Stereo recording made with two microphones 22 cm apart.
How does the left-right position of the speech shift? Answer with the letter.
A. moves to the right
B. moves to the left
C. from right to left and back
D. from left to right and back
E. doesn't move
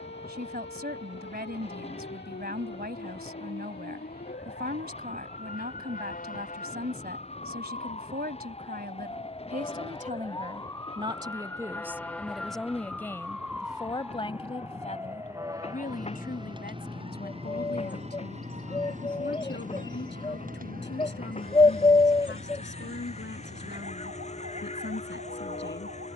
B.